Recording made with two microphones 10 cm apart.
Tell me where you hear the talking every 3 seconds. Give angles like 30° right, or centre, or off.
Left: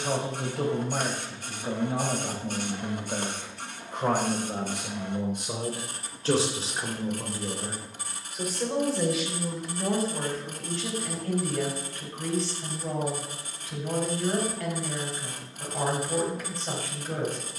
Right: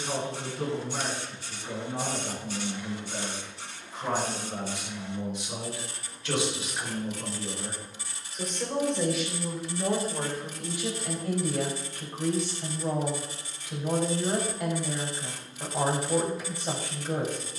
80° left, 60° left, 20° left, 10° right, 20° right, 20° right.